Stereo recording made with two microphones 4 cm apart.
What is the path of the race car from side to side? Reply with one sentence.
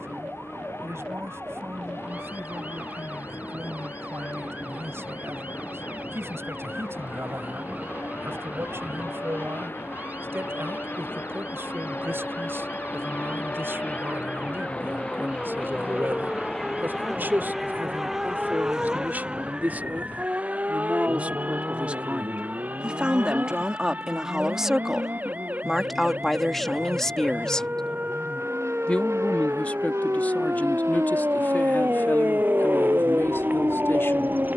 You can hear the race car go from the left side to the right.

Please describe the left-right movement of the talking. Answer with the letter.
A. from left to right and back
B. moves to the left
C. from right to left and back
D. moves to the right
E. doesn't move
B.